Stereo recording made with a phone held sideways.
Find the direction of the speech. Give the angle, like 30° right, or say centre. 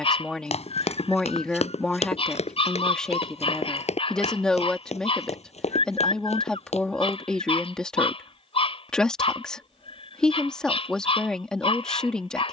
10° left.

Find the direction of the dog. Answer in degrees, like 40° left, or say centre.
40° left.